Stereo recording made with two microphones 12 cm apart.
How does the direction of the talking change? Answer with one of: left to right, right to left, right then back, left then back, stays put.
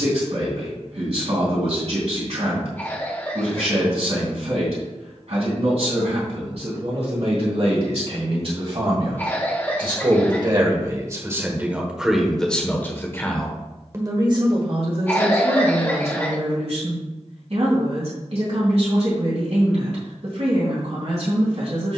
left then back.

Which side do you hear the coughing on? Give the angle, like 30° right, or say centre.
20° left.